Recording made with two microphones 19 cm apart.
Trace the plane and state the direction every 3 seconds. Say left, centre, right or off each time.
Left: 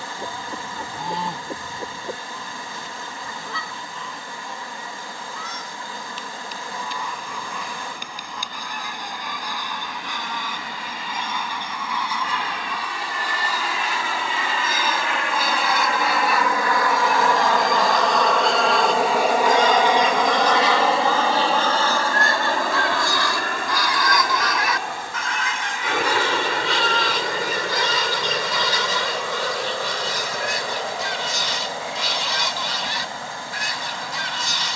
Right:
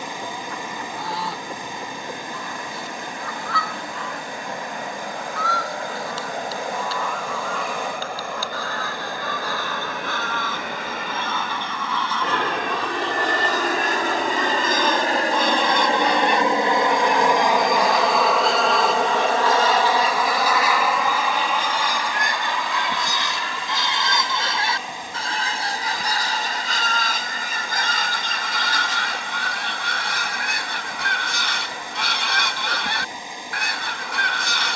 right, right, right, right, right, right, centre, left, left, left, left, left.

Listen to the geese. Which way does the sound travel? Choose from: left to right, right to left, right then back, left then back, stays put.
left to right.